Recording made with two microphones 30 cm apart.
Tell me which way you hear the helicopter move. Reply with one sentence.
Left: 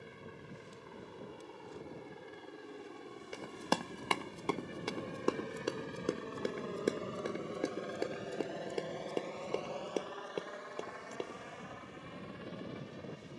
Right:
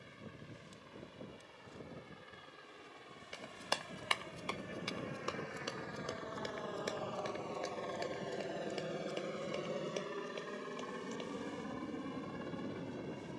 In this clip you hear the helicopter move from left to right.